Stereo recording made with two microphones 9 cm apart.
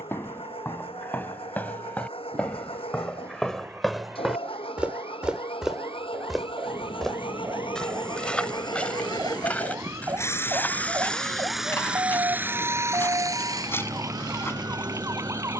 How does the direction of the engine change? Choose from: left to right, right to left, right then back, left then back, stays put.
left to right.